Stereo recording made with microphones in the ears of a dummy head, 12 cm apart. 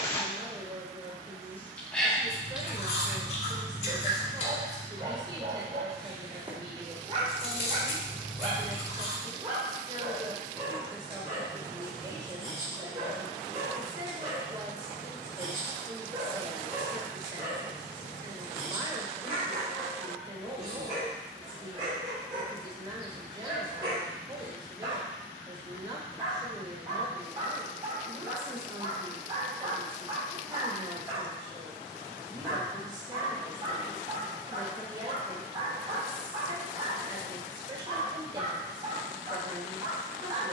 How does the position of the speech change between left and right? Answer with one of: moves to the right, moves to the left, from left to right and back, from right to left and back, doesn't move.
doesn't move.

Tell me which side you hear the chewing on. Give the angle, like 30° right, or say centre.
50° left.